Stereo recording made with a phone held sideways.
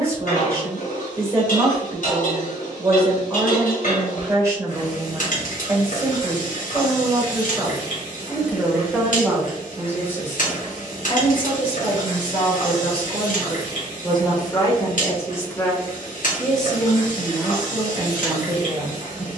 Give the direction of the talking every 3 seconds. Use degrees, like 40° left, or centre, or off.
20° right, 20° right, 20° right, 20° left, 40° left, centre, 20° right.